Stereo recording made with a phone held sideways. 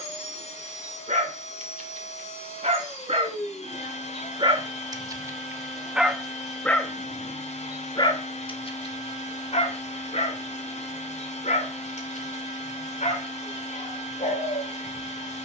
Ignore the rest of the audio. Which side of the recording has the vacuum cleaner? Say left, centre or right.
left.